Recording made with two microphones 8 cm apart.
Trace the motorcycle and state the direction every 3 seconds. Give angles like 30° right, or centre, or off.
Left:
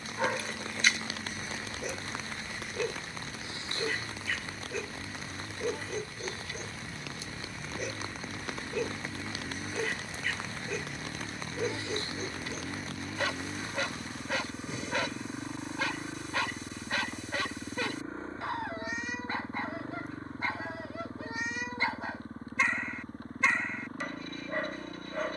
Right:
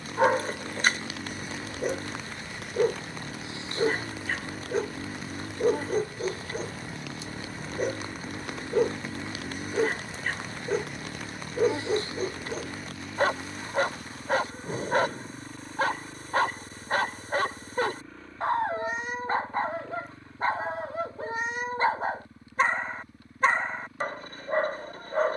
60° right, 50° right, 40° right, 10° right, 10° left, 20° left, 40° left, 40° left, 50° left.